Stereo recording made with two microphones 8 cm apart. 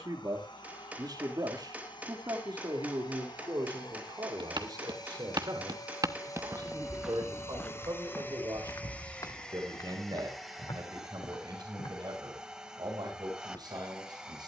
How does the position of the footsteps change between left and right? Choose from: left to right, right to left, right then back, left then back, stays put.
right to left.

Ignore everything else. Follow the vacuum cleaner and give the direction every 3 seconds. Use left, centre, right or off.
left, left, left, centre, centre.